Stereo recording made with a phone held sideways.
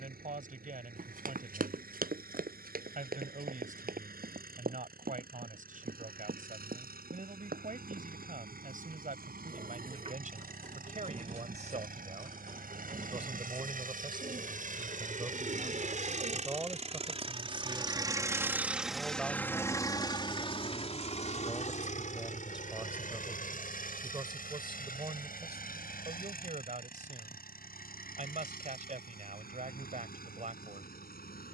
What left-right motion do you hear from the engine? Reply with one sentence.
You can hear the engine travel towards the left.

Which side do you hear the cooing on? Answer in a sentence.
You can hear the cooing on the right.